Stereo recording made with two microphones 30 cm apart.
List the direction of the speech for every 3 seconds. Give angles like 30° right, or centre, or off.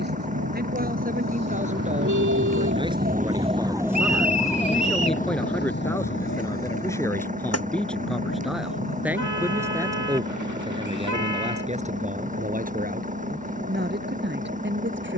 30° right, centre, 10° left, 10° right, 30° right.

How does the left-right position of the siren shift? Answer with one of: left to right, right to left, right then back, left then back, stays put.
right to left.